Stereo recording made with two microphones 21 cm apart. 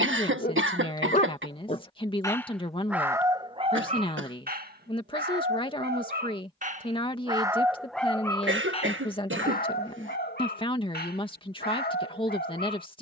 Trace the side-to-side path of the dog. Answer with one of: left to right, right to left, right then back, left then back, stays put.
right then back.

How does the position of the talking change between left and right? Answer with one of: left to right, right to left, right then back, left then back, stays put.
stays put.